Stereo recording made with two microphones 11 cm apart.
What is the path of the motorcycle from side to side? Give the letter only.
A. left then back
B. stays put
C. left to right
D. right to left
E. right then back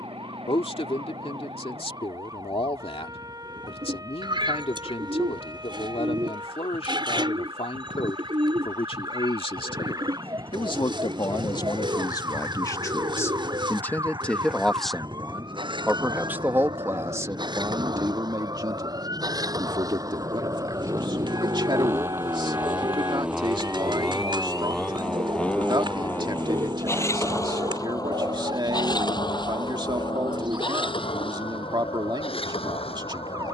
D.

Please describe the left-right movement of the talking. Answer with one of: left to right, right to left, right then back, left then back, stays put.
left to right.